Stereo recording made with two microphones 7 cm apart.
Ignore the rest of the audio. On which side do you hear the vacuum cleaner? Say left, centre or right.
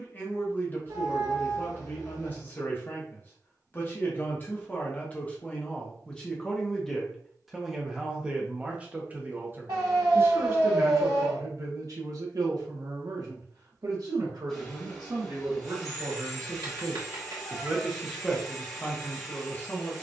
centre.